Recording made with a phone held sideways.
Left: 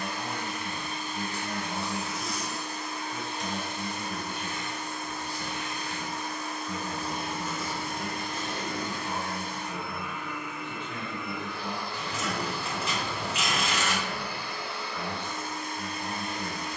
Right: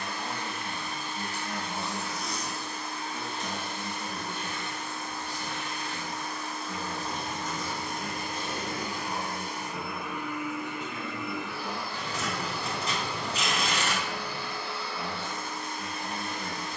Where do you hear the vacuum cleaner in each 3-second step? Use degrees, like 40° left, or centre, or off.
20° left, 20° left, 10° left, 10° right, 10° left, 20° left.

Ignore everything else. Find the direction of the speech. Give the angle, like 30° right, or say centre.
30° left.